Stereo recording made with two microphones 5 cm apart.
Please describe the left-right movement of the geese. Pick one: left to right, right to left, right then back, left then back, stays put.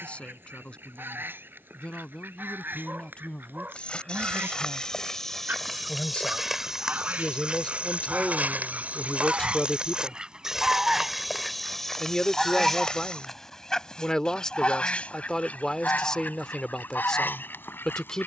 right to left.